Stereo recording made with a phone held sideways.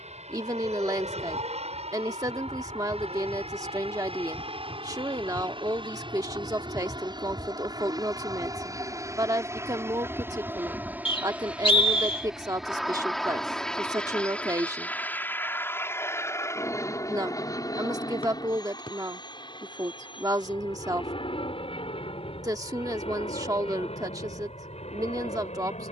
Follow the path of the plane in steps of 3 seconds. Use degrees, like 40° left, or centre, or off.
50° right, 40° right, 30° right, 10° right, centre, 20° left, 30° left, 40° left, 50° left.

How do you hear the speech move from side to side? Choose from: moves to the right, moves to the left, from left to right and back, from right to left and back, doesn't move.
doesn't move.